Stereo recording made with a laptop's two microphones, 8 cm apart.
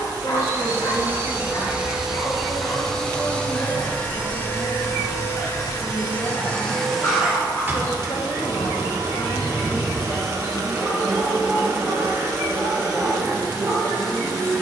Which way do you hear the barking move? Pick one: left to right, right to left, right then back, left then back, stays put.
left to right.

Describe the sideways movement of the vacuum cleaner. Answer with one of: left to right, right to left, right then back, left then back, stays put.
left then back.